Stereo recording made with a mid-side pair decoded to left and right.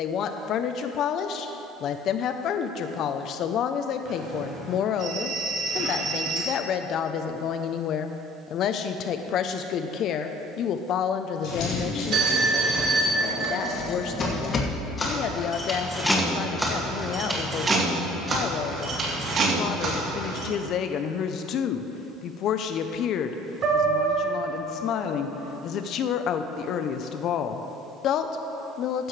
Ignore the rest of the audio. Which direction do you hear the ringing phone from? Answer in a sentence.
You can hear the ringing phone on the right.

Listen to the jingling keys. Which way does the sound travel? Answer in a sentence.
You can hear the jingling keys travel towards the right.